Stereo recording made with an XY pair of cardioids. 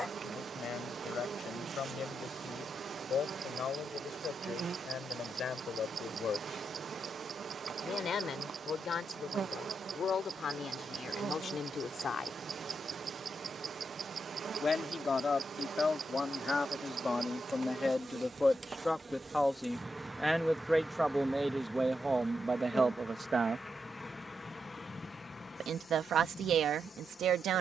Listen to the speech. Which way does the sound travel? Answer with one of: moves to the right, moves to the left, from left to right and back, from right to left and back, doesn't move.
moves to the right.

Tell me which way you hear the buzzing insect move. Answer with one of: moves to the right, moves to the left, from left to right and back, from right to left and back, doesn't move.
moves to the left.